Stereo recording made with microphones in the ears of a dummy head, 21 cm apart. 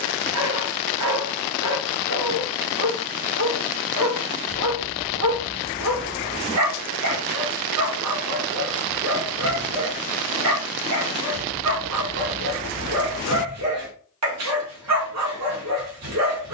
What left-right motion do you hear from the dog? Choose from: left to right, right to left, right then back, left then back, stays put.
stays put.